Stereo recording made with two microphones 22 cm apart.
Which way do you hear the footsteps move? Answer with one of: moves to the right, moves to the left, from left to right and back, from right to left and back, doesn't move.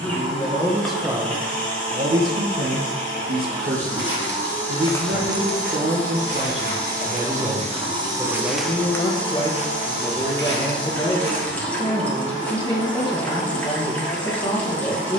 from left to right and back.